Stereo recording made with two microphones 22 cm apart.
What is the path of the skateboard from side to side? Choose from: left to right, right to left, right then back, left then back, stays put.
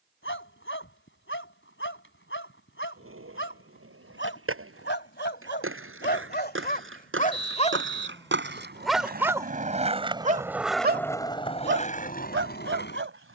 right to left.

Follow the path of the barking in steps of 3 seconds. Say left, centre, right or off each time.
left, left, left, right, right.